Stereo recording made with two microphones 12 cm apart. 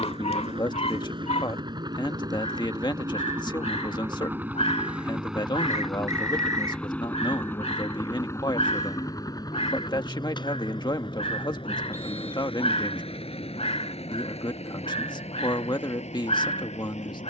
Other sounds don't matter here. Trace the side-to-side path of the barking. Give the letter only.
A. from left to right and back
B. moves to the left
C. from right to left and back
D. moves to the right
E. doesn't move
E.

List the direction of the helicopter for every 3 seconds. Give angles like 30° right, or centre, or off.
40° right, 10° right, 20° left, 40° left, 50° left, 60° left.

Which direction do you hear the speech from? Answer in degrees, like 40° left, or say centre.
40° left.